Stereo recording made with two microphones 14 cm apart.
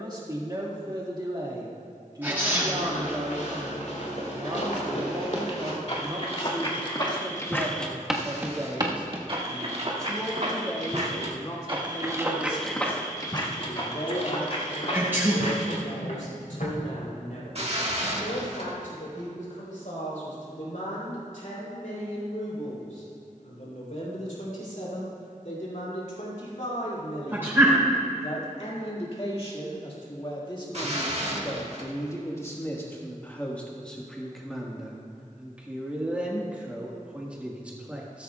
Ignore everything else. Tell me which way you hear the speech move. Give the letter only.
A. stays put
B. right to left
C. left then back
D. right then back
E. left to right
C.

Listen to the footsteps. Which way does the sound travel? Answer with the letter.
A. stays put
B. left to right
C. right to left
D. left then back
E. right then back
E.